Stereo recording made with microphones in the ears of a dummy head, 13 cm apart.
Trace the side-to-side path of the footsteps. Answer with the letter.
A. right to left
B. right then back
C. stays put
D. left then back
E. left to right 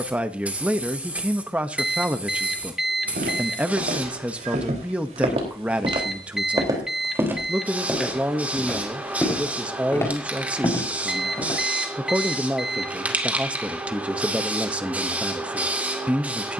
A.